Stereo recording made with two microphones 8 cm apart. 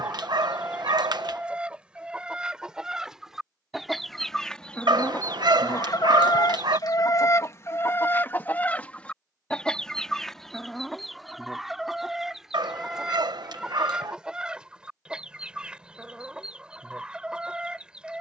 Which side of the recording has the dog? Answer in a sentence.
In this clip you hear the dog on the right.